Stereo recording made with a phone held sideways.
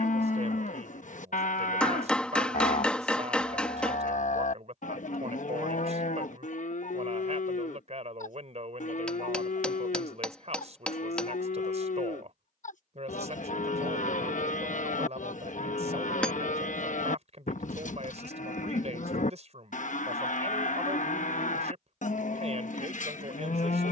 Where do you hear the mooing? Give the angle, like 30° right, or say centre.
70° left.